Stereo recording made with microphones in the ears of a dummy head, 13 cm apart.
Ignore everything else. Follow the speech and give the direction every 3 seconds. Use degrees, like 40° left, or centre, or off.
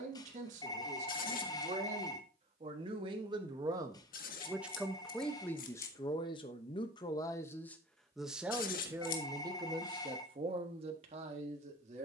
50° right, 10° right, 20° left, 40° right.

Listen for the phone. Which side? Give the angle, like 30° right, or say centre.
30° left.